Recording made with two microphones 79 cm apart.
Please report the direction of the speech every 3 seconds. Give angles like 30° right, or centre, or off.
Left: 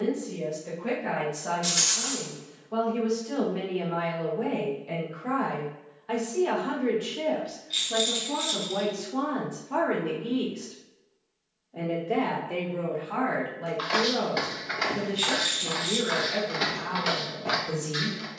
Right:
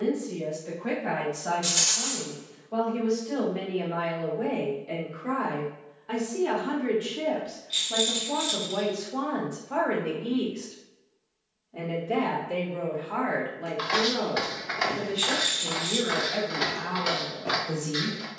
50° left, 40° left, centre, 30° right, centre, 50° left.